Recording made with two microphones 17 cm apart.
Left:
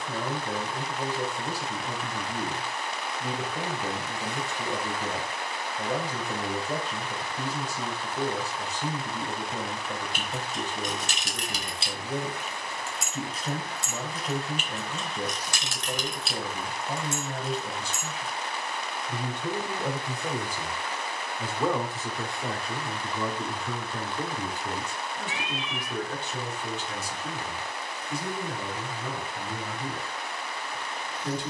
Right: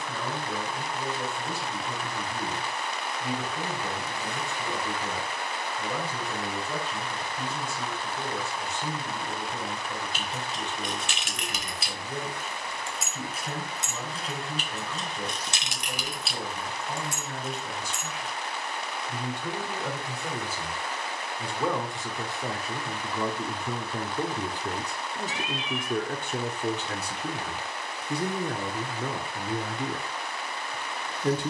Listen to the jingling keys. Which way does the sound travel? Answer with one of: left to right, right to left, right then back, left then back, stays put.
right then back.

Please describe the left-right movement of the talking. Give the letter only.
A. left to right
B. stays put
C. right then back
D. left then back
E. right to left
A.